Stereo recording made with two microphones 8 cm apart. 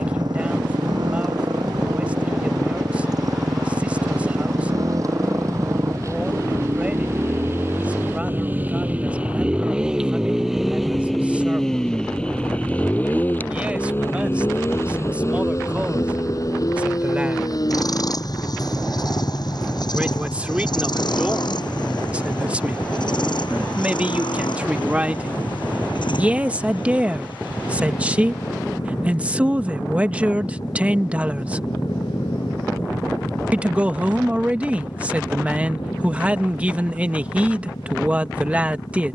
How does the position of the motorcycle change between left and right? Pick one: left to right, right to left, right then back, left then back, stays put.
right to left.